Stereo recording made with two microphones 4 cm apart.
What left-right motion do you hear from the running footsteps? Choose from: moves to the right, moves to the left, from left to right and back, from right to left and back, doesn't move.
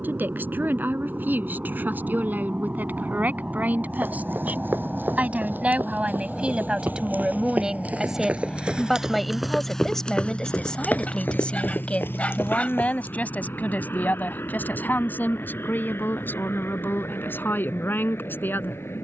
moves to the left.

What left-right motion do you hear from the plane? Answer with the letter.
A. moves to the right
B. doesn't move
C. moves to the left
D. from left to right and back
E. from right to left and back
C.